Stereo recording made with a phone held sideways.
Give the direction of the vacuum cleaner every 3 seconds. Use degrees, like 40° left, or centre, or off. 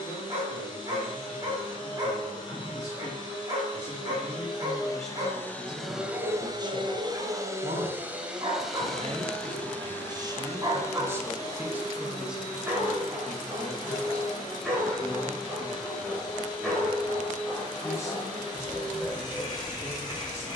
40° left, 30° left, 20° right, 20° left, 30° left, 30° left, 30° left.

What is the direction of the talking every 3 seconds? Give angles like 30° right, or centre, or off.
30° left, 10° left, 40° right, 20° right, centre, 20° left, 20° left.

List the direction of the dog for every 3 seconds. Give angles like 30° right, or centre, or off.
30° right, 30° right, 30° right, 20° right, 10° right, centre, 10° left.